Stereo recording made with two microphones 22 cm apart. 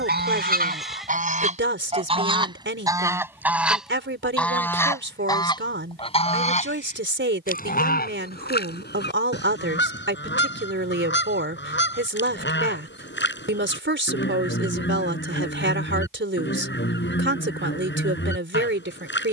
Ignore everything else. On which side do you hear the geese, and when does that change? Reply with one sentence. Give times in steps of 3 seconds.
In this clip you hear the geese on the right from 0 s, in the centre from 3 s and on the left from 6 s.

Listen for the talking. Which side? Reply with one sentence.
You can hear the talking on the right.